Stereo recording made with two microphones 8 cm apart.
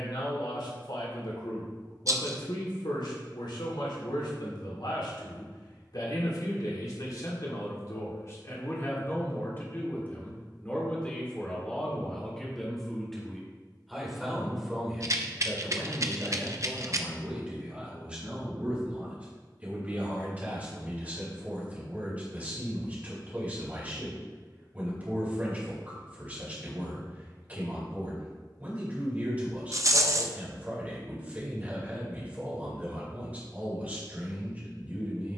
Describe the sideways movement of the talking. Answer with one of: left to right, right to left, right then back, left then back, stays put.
left to right.